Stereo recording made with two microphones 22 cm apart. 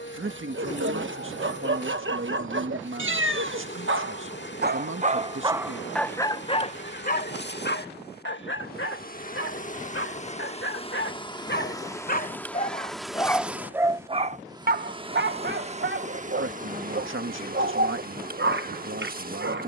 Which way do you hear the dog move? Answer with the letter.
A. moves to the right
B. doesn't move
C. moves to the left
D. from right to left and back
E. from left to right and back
D.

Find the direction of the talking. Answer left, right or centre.
right.